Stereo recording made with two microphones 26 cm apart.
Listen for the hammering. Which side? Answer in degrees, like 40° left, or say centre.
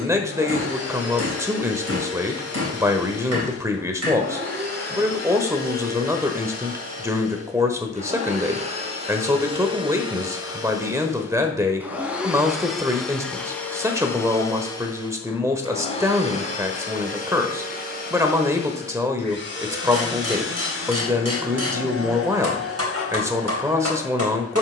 70° right.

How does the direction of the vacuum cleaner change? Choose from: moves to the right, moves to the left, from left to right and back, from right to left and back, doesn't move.
moves to the left.